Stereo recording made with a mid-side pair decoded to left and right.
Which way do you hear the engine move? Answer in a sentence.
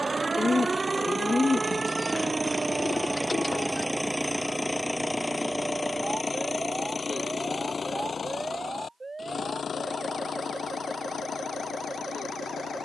You can hear the engine move to the left.